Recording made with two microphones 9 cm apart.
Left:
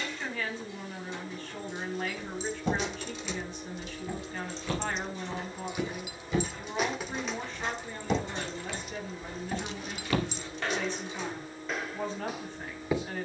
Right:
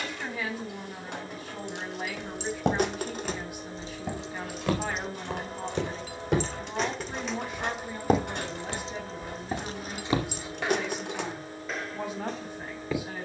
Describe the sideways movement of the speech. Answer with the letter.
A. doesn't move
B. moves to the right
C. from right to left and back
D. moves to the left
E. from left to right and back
A.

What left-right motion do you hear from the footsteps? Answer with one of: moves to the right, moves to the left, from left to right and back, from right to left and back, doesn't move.
moves to the left.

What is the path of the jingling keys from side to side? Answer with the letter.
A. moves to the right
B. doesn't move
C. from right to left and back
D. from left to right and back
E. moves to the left
C.